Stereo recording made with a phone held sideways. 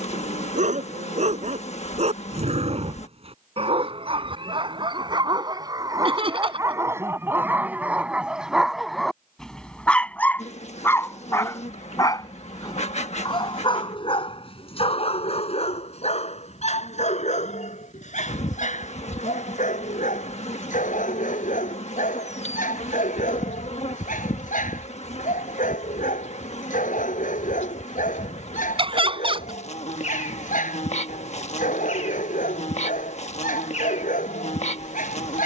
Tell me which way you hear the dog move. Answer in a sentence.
In this clip you hear the dog move from right to left.